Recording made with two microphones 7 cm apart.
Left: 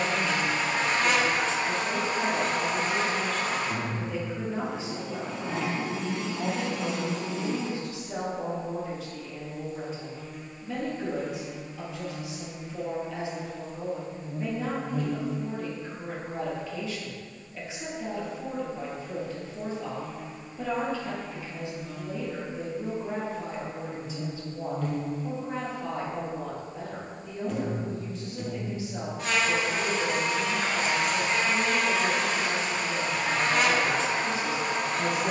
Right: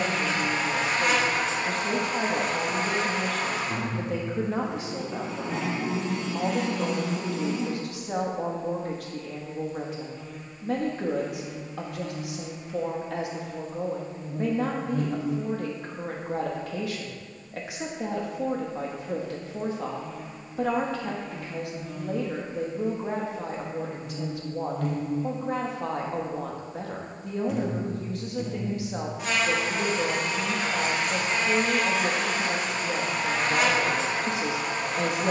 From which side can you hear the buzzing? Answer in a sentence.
You can hear the buzzing in the centre.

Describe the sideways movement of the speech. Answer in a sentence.
In this clip you hear the speech stay in one place.